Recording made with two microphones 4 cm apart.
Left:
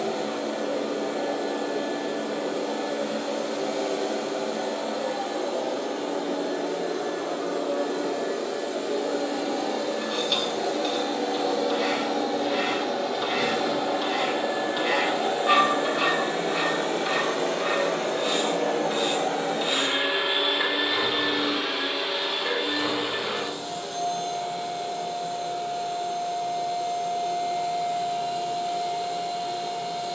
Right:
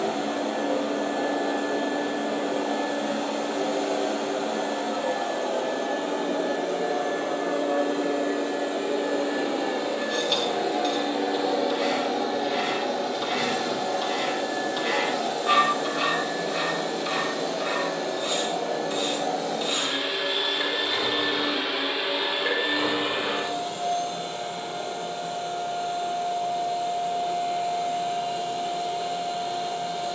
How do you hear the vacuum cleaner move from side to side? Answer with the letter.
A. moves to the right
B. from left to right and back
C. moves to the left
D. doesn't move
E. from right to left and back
E.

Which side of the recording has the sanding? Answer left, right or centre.
centre.